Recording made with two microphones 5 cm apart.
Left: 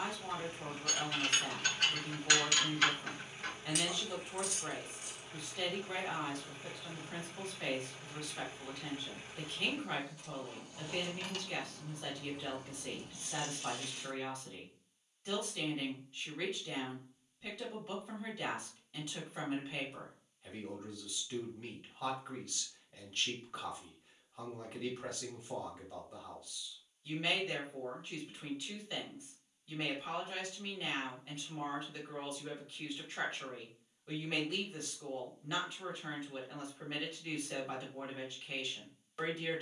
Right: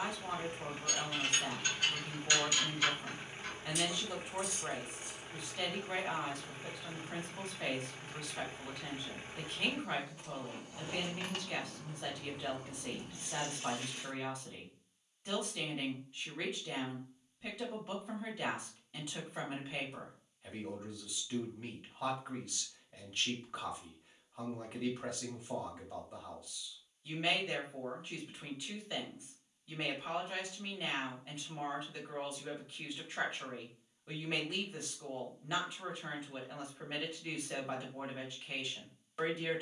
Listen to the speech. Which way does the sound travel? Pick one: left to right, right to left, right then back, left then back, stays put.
stays put.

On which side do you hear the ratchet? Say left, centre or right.
left.